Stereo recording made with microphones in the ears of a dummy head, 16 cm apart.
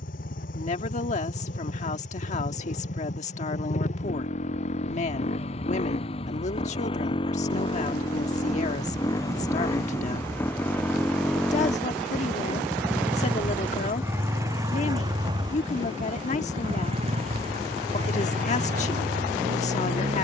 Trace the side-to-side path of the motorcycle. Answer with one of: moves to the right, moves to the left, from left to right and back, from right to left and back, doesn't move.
moves to the right.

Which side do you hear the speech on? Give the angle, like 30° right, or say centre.
40° left.